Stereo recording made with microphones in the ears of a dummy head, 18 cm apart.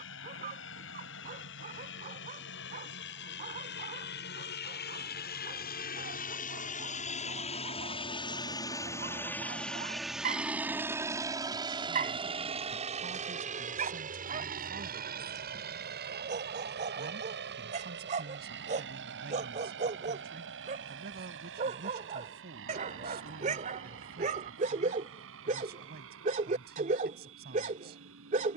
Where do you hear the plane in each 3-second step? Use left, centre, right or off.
left, left, left, centre, right, right, right, right, right, right.